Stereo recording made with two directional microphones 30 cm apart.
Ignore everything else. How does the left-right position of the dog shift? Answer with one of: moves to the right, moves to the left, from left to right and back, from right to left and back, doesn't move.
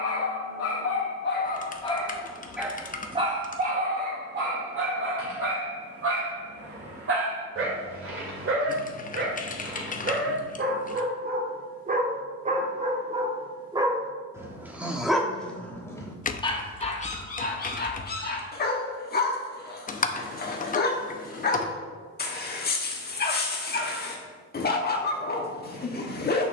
from left to right and back.